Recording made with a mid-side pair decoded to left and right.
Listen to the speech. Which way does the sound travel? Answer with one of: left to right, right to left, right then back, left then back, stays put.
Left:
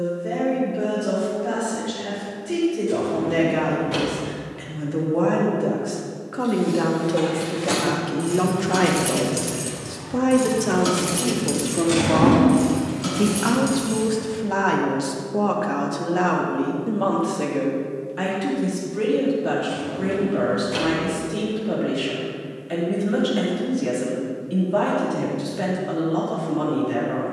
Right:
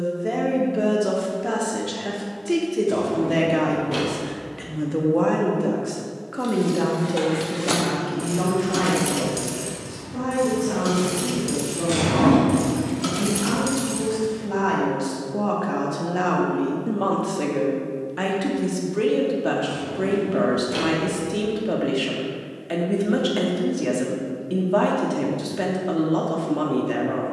left then back.